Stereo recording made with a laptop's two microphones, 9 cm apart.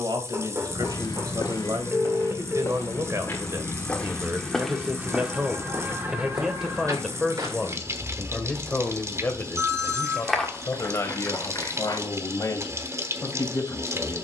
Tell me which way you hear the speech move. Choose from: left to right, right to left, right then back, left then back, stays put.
right to left.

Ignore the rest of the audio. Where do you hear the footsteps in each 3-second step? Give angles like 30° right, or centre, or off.
40° left, centre, 40° right, 20° left, off.